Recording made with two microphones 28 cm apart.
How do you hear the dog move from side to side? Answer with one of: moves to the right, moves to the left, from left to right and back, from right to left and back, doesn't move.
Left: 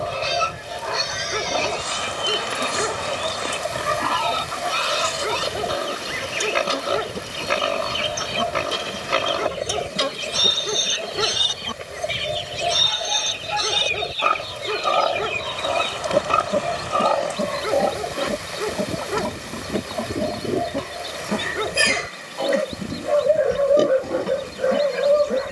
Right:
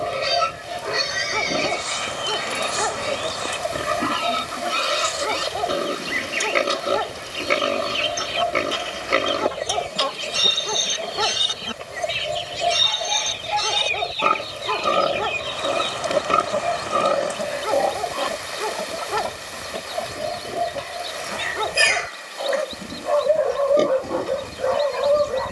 doesn't move.